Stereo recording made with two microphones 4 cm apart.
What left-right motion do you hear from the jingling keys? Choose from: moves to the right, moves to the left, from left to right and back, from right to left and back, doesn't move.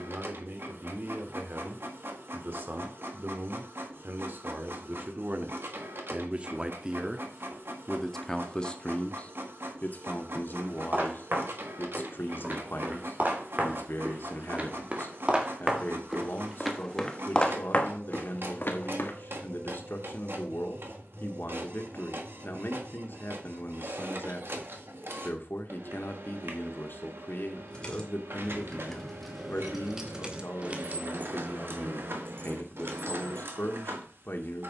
moves to the right.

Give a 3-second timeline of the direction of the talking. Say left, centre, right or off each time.
right, right, centre, left, left, left, left, left, left, left, left, left.